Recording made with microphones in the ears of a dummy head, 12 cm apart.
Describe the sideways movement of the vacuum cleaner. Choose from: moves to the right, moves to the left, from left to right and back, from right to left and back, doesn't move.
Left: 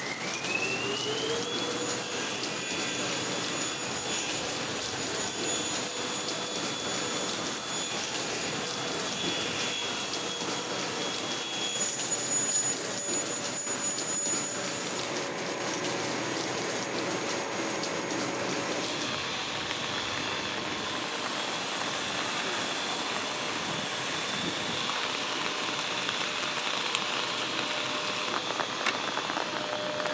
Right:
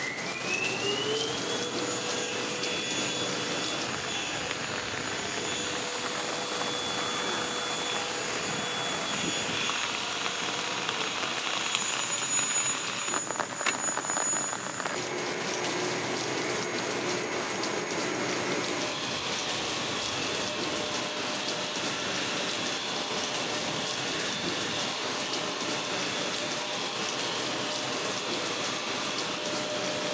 doesn't move.